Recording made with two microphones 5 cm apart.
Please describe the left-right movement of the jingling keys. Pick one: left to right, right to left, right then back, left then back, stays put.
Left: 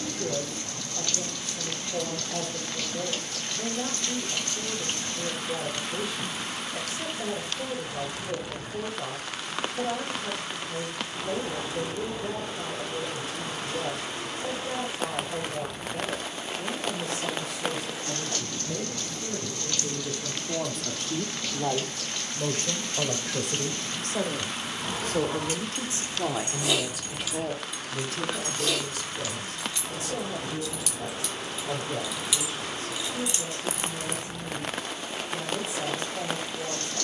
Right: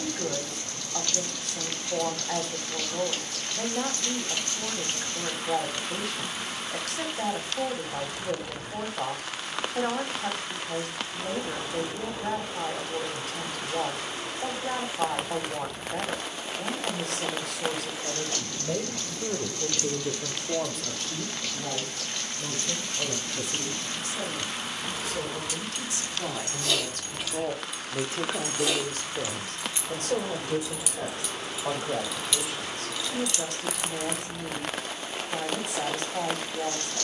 right then back.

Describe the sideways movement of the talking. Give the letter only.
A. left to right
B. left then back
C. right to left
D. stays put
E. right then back
B.